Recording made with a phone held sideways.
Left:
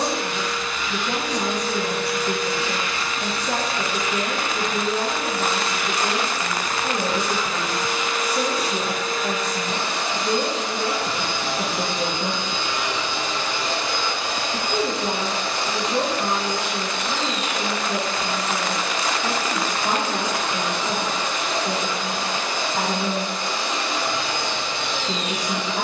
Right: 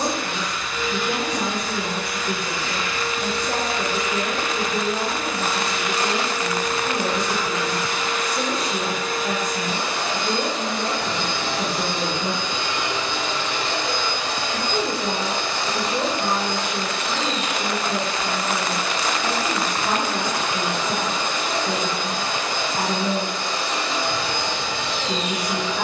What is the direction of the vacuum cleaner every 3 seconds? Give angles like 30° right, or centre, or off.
60° left, 60° left, 30° left, centre, 40° left, 60° left, 60° left, 60° left, 60° left.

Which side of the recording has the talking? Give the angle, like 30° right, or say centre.
40° left.